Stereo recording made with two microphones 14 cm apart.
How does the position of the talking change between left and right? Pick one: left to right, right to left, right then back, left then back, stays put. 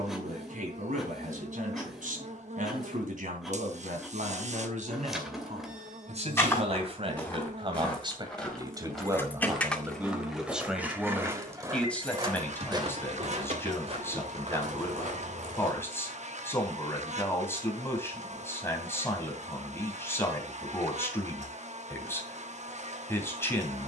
right to left.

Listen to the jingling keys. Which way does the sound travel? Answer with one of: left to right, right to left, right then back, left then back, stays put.
left to right.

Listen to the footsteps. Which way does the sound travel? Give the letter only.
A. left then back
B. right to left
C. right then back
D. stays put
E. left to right
E.